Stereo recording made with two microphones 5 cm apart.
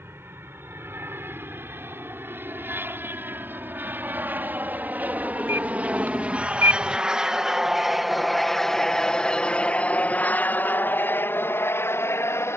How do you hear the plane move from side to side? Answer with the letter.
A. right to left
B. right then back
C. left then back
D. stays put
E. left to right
A.